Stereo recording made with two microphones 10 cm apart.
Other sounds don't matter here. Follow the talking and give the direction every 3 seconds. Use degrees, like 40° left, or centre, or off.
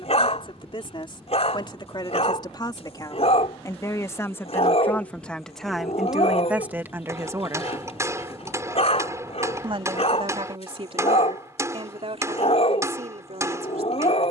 50° left, 20° left, 20° right, 60° right, 70° right.